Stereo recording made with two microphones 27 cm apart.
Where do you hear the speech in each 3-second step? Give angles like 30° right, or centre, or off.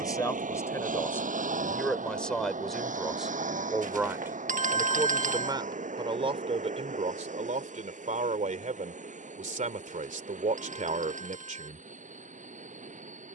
10° left, 10° right, 30° right, 30° right, off.